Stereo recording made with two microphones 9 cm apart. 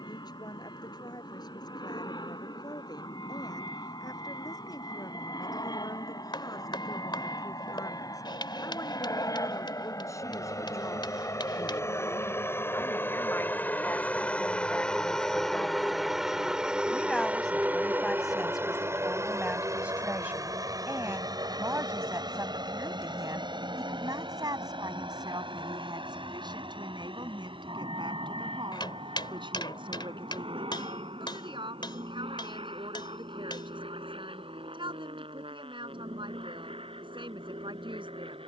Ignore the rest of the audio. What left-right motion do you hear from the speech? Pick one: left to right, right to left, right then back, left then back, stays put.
left to right.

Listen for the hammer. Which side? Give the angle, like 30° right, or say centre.
60° left.